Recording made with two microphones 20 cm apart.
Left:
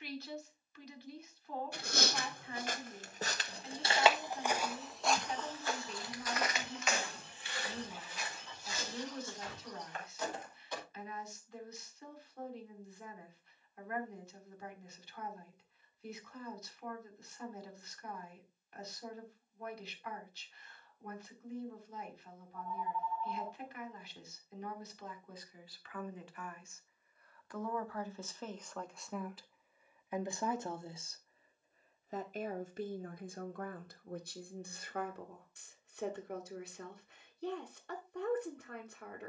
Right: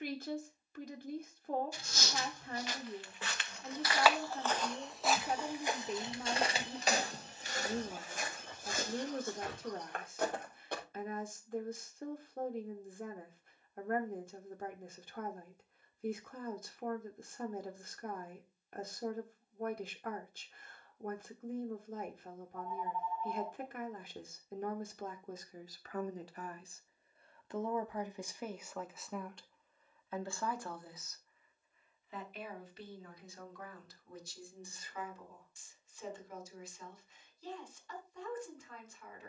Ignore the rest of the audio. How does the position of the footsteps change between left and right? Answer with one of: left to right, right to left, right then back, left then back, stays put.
left to right.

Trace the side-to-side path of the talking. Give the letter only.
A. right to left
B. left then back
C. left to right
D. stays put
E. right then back
A.